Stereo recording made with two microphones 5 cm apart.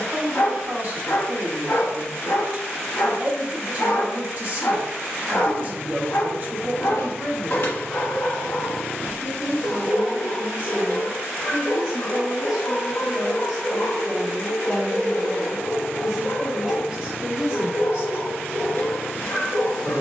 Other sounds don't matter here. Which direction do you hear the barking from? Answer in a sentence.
In this clip you hear the barking on the left.